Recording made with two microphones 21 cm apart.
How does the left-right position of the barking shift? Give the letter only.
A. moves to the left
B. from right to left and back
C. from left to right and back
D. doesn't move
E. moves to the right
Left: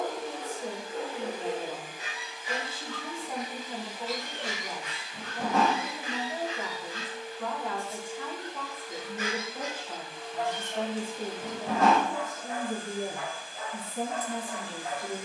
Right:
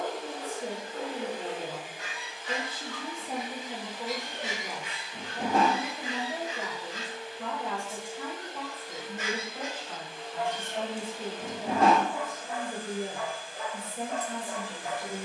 E.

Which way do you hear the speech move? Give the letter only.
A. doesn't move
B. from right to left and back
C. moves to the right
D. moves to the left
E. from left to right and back
D.